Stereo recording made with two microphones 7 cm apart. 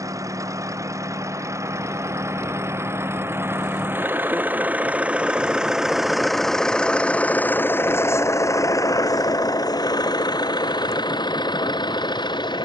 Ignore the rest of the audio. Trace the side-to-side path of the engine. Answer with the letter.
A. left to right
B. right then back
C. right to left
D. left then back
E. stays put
C.